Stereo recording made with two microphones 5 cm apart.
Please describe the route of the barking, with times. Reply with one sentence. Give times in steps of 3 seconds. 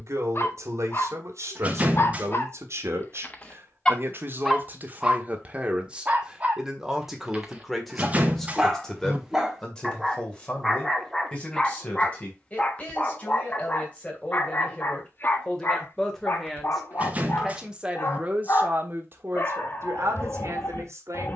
In this clip you hear the barking on the left from 0 s, in the centre from 3 s, on the right from 6 s, in the centre from 9 s and on the left from 12 s.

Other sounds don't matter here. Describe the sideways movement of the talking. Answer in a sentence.
You can hear the talking go left and come back.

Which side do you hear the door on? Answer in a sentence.
You can hear the door on the right.